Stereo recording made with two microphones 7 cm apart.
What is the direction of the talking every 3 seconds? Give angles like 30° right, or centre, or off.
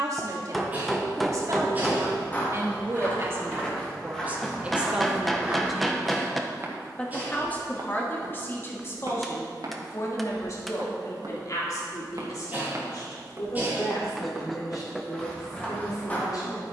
50° right, 20° right, 20° left, 50° left, 60° left, 60° left.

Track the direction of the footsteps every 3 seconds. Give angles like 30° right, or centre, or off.
20° left, centre, 50° right, 70° right, 40° right, 20° left.